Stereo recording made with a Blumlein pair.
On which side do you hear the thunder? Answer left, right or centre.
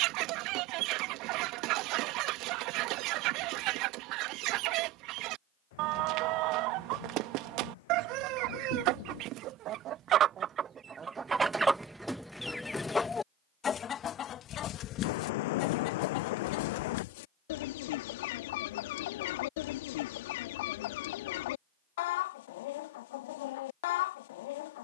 left.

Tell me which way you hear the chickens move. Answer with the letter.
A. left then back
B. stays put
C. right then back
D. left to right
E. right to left
E.